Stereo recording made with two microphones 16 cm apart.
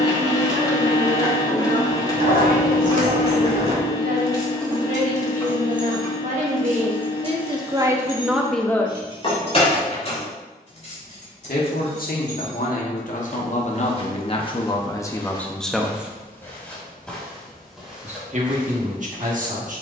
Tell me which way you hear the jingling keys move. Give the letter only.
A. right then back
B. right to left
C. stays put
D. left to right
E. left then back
B.